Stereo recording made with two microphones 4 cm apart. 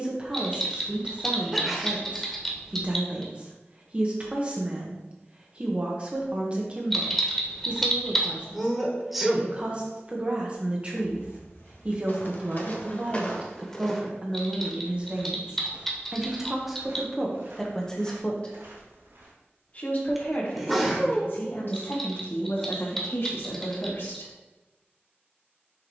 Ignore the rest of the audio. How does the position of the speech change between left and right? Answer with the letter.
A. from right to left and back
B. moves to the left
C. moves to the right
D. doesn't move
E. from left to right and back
B.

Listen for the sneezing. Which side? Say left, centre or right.
centre.